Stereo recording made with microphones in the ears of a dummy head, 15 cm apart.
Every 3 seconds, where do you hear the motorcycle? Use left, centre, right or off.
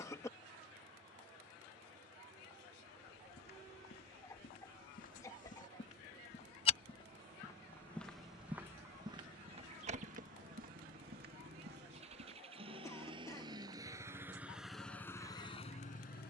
right, right, right, right, right, left.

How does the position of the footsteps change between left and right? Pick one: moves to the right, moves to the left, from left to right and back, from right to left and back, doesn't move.
moves to the right.